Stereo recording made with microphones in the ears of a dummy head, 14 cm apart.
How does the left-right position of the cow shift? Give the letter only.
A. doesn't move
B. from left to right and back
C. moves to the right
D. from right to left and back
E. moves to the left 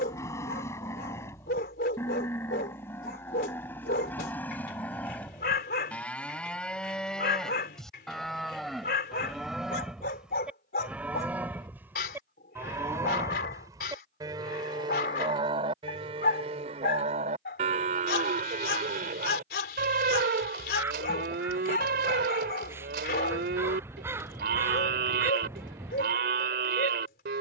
C.